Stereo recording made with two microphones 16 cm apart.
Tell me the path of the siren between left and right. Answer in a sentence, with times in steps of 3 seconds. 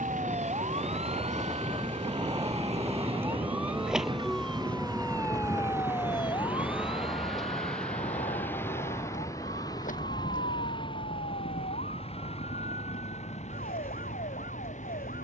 You can hear the siren on the right from 0 s, in the centre from 3 s and on the left from 6 s.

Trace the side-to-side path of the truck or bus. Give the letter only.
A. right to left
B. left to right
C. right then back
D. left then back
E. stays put
A.